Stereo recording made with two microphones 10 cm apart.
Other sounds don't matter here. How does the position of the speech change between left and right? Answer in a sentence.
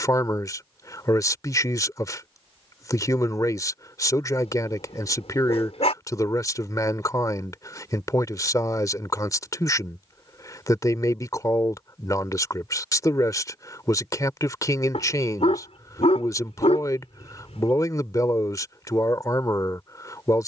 In this clip you hear the speech stay put.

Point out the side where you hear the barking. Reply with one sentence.
You can hear the barking on the left.